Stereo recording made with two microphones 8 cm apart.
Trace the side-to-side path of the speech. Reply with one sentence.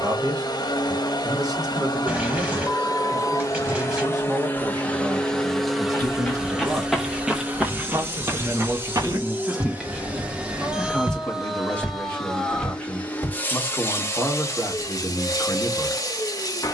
In this clip you hear the speech travel towards the left.